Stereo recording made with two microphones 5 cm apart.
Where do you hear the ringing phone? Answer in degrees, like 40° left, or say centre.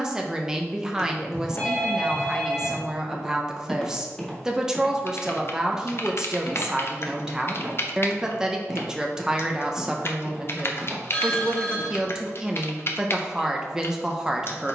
20° left.